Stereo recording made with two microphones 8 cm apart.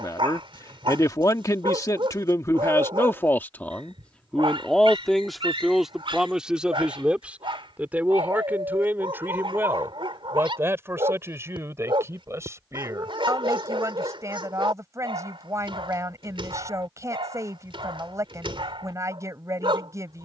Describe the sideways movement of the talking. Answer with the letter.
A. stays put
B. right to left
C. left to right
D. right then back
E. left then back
C.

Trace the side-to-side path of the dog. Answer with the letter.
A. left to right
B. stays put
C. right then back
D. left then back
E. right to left
B.